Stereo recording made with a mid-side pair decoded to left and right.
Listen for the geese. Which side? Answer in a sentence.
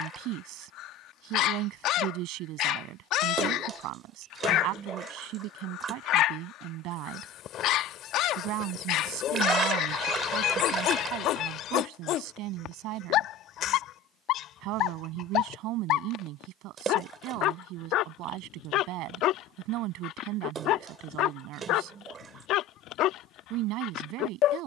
You can hear the geese on the left.